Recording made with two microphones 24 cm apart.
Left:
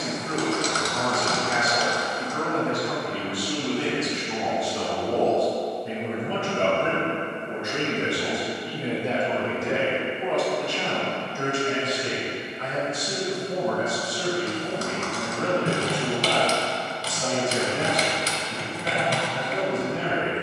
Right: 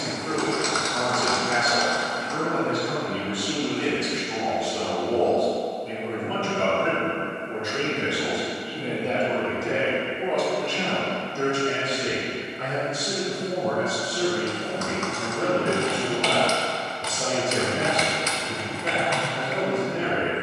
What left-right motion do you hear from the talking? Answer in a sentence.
You can hear the talking move from right to left and back again.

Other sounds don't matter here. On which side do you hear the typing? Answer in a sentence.
In this clip you hear the typing on the left.